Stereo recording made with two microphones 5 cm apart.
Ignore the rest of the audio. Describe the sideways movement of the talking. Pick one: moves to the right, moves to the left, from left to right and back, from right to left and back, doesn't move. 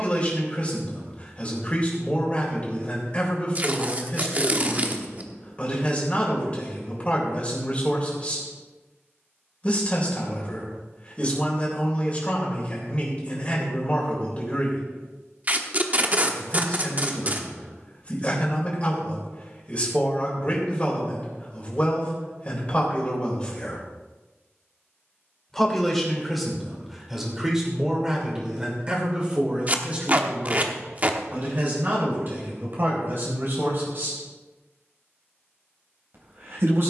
moves to the right.